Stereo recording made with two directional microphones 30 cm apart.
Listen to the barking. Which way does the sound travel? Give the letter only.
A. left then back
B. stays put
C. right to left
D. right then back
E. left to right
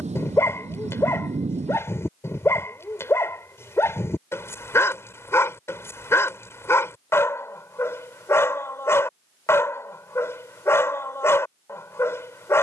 B.